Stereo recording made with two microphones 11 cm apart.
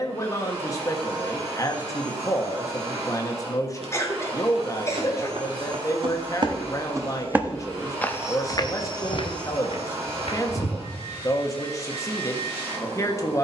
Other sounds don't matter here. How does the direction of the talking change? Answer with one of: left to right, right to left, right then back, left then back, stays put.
stays put.